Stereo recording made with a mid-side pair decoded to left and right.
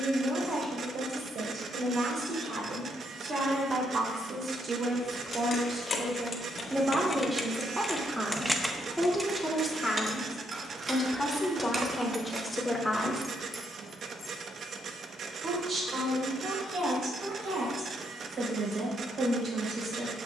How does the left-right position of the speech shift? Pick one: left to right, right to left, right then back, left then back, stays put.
left then back.